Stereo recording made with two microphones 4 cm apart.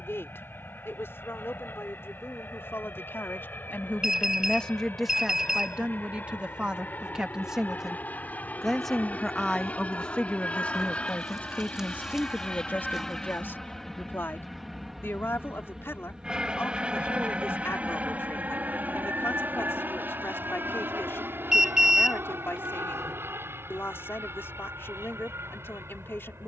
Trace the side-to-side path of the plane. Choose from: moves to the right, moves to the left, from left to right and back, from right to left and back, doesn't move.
moves to the right.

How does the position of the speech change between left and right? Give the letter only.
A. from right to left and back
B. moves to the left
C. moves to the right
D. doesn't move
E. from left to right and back
E.